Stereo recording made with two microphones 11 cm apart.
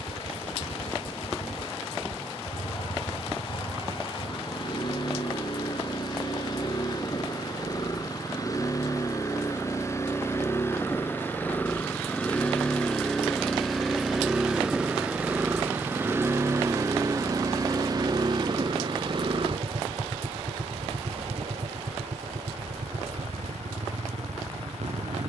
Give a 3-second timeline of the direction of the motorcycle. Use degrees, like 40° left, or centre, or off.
50° left, 40° left, 30° left, 20° left, centre, 20° right, 50° right, 60° right, 70° right.